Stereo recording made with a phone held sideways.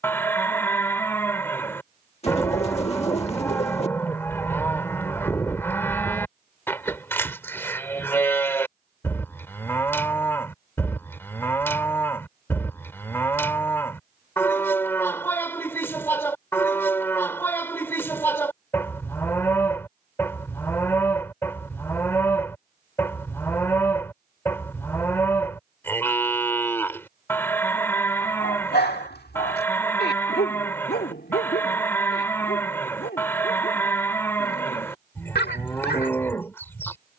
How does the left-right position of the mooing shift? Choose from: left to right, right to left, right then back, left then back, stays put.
stays put.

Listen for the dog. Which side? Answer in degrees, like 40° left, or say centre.
70° left.